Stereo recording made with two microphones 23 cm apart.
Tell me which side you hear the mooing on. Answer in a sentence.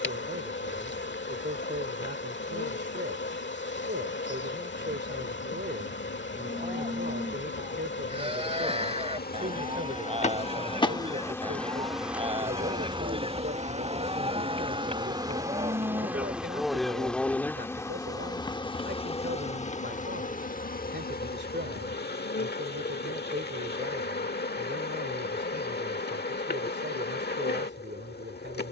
In this clip you hear the mooing on the right.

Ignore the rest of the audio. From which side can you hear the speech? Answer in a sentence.
In this clip you hear the speech on the right.